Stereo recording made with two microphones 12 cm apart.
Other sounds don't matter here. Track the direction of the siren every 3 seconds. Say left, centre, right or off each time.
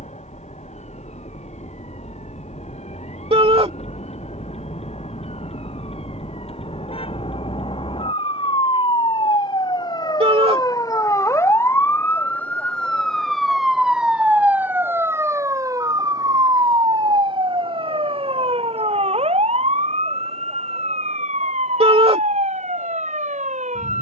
left, left, left, left, centre, right, right, right.